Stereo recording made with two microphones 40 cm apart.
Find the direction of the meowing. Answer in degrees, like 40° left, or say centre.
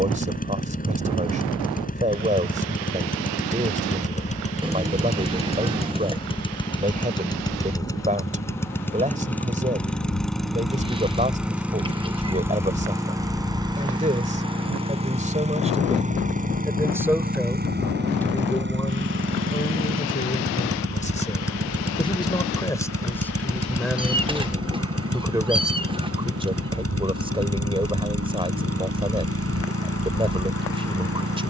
10° right.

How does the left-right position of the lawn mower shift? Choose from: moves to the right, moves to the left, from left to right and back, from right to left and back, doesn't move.
moves to the right.